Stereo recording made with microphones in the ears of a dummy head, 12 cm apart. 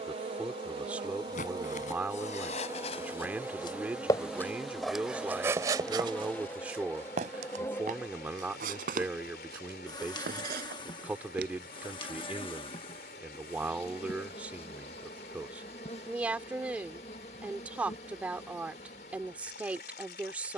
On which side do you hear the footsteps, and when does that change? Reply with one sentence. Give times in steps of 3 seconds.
You can hear the footsteps on the left from 0 s, in the centre from 3 s, on the right from 6 s and not at all from 12 s.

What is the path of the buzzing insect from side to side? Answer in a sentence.
In this clip you hear the buzzing insect travel towards the left.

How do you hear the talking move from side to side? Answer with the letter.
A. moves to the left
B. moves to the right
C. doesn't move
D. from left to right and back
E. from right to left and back
C.